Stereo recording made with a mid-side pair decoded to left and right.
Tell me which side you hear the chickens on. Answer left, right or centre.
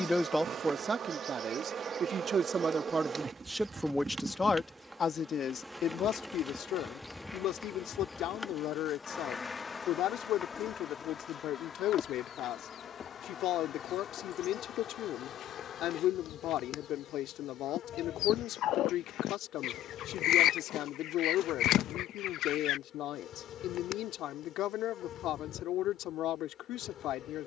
left.